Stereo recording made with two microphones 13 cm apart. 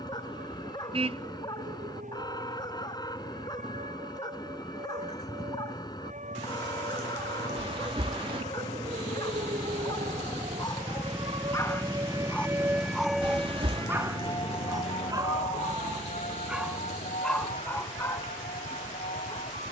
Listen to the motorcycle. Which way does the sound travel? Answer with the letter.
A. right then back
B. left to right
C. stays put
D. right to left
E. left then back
B.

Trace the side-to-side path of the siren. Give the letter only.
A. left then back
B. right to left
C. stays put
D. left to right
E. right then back
B.